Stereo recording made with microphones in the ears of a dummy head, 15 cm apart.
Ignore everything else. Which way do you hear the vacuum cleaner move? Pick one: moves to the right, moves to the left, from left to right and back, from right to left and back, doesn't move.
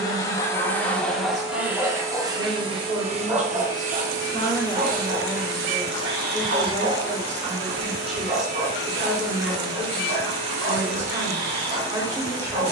moves to the right.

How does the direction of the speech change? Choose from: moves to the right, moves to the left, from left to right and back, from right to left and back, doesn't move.
from right to left and back.